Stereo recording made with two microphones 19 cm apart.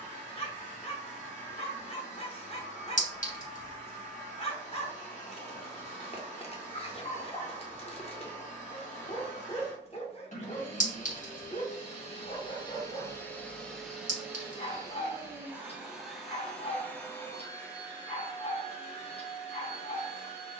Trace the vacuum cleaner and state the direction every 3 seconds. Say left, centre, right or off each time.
left, left, left, left, centre, centre, left.